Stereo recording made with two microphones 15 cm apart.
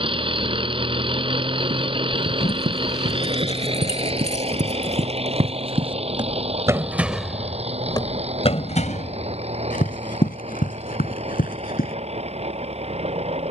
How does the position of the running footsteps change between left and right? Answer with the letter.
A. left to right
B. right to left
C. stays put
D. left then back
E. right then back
B.